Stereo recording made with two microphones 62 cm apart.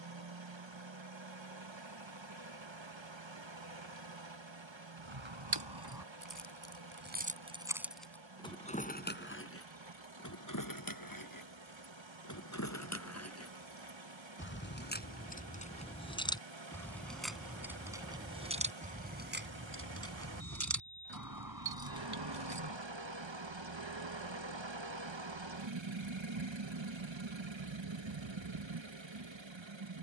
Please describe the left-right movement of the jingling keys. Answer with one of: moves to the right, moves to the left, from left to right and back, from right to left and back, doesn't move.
from right to left and back.